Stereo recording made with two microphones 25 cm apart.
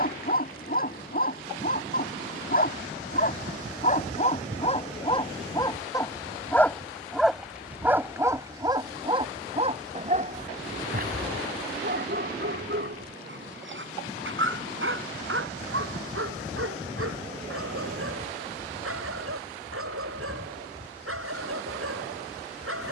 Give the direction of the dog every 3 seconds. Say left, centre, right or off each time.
left, left, centre, right, right, right, right, right.